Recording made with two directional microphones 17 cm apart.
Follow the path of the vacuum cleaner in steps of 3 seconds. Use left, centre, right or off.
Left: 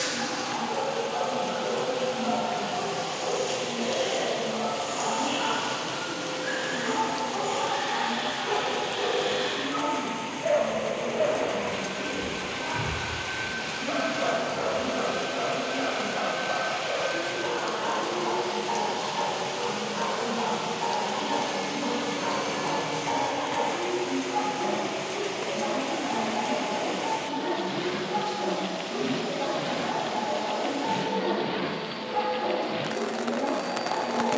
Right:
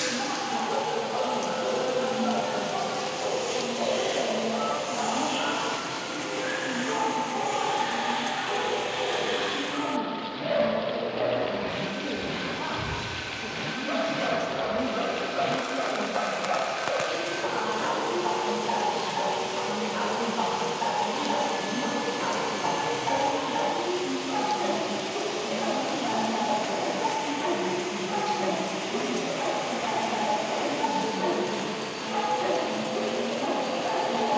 left, left, left, left, left, left, left, centre, right, right, right, right.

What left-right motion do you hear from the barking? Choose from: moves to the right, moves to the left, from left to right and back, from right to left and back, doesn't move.
from right to left and back.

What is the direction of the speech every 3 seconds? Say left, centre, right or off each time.
right, right, right, right, right, right, right, right, right, centre, left, left.